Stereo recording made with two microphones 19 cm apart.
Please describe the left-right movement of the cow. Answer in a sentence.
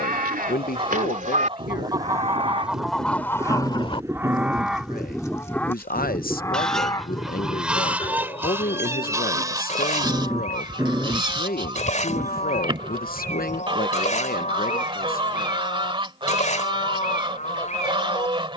In this clip you hear the cow travel towards the left.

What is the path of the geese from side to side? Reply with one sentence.
You can hear the geese go left and come back.